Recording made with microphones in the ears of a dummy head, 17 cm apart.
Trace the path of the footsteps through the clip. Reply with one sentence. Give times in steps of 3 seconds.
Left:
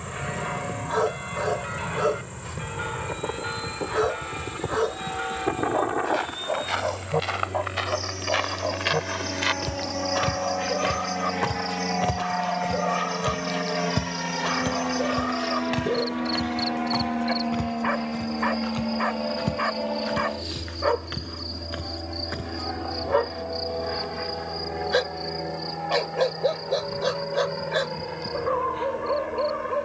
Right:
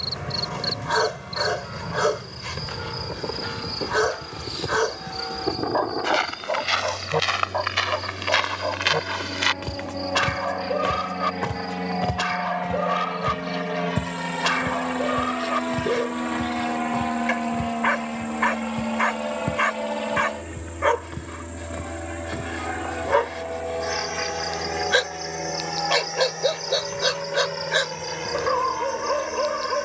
You can hear the footsteps not at all from 0 s, on the right from 6 s, in the centre from 9 s, on the left from 12 s and not at all from 24 s.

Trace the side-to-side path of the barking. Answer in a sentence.
In this clip you hear the barking stay put.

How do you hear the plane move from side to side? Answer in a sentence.
In this clip you hear the plane travel towards the right.